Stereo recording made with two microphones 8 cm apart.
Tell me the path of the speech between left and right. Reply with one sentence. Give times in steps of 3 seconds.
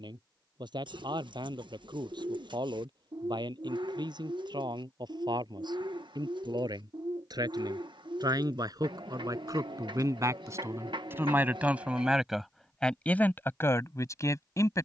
In this clip you hear the speech on the right from 0 s and on the left from 12 s.